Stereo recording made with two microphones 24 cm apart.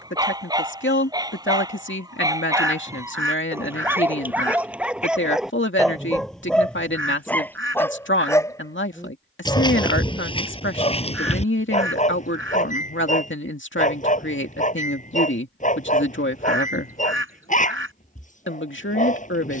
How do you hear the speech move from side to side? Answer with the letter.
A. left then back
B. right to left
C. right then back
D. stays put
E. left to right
D.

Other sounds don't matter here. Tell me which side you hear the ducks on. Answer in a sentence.
In this clip you hear the ducks on the right.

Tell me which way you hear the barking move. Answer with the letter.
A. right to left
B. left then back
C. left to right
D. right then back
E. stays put
A.